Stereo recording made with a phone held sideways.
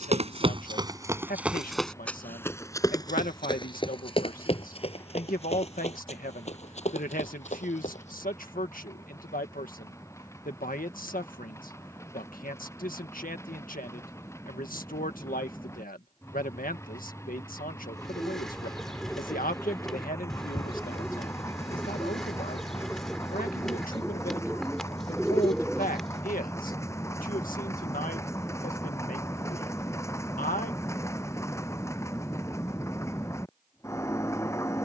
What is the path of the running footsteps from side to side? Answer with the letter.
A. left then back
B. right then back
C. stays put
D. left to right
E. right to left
E.